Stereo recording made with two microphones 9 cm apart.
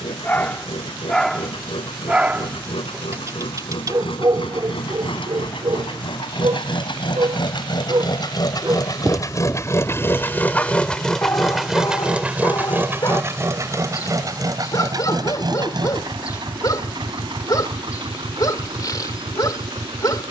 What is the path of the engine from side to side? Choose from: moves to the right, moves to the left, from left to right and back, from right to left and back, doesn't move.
moves to the right.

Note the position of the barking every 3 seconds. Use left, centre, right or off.
centre, right, right, centre, left, left, left.